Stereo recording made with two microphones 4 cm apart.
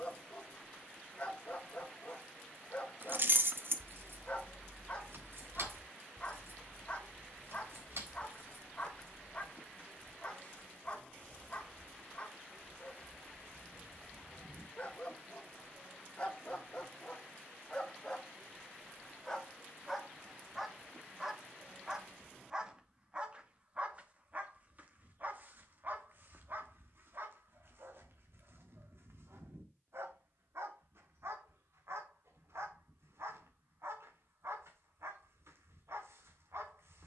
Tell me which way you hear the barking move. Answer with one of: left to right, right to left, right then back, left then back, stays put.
left to right.